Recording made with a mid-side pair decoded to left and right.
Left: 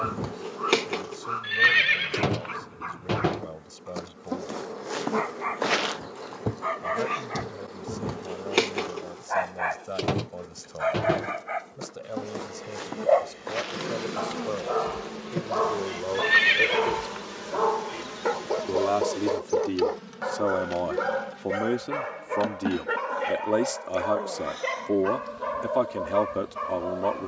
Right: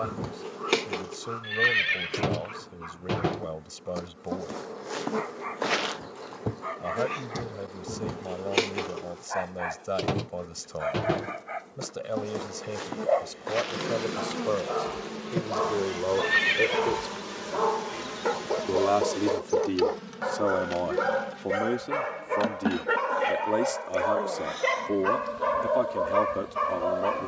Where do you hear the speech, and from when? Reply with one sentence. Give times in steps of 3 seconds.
In this clip you hear the speech on the right from 0 s, in the centre from 18 s and on the left from 21 s.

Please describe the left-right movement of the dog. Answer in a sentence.
You can hear the dog move from left to right.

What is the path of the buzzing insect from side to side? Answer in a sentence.
You can hear the buzzing insect travel towards the right.